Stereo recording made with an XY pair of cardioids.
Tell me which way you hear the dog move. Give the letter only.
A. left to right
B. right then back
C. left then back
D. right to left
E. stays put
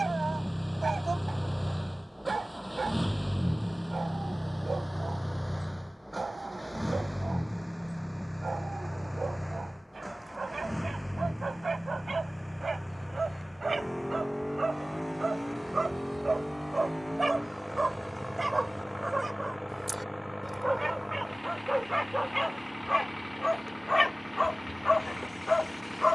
D.